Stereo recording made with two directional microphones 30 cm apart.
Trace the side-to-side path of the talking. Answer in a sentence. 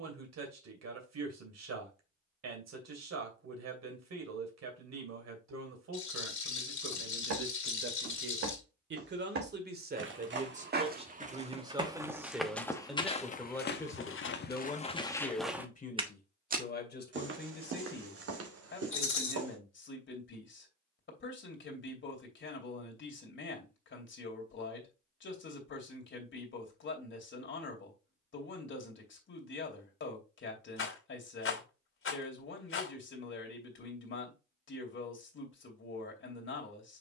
You can hear the talking move from right to left.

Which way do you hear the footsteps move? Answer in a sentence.
In this clip you hear the footsteps move from right to left and back again.